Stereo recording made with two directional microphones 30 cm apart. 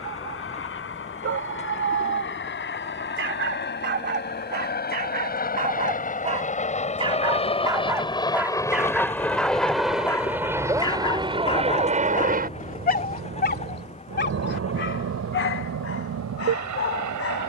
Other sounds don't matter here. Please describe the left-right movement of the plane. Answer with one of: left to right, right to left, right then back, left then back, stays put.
left to right.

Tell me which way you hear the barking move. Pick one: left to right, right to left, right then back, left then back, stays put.
right to left.